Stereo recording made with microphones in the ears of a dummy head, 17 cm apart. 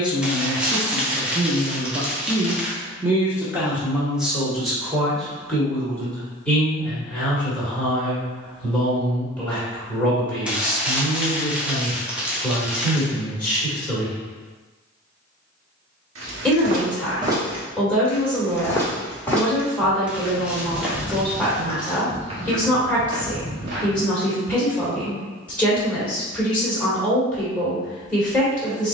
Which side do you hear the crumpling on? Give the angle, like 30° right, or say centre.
10° right.